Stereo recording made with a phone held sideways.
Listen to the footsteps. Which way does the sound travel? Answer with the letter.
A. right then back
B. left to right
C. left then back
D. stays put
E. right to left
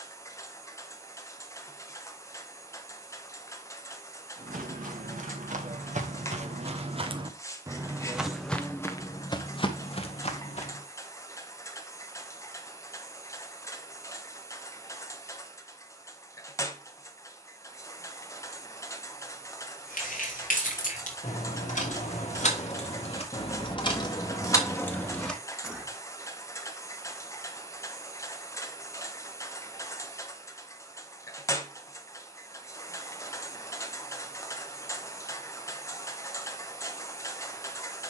E.